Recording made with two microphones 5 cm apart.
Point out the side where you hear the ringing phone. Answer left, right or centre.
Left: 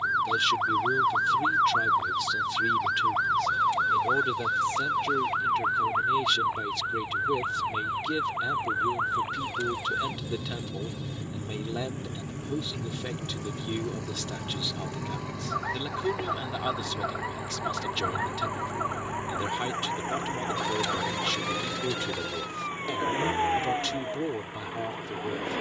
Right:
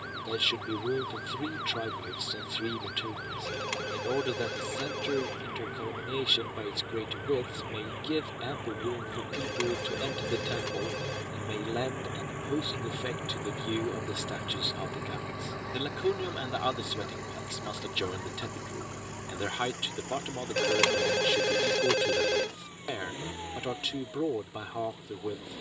right.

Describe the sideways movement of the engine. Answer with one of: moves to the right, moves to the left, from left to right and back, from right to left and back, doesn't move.
moves to the left.